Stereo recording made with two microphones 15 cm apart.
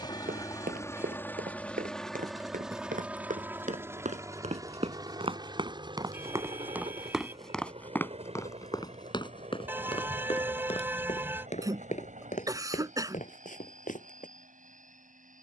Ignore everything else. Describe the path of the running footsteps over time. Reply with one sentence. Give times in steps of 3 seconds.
In this clip you hear the running footsteps on the right from 0 s, in the centre from 6 s and on the left from 9 s.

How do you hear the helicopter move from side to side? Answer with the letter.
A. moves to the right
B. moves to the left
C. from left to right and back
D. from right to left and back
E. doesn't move
A.